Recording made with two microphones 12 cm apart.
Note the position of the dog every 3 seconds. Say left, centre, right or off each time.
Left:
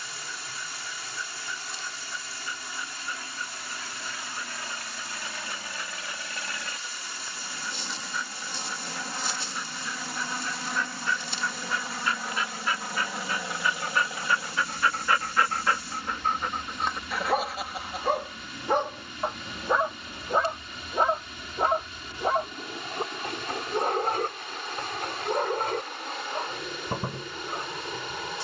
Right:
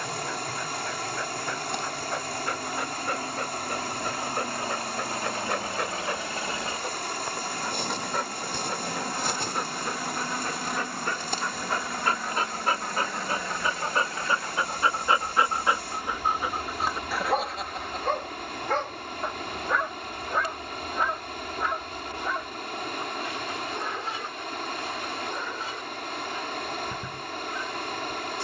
right, right, right, right, right, centre, left, left, left, left.